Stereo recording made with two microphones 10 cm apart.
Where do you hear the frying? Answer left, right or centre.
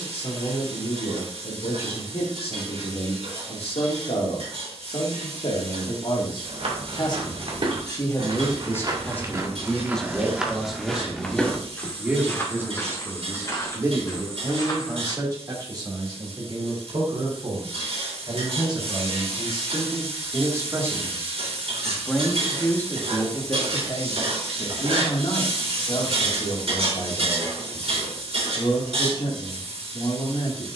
right.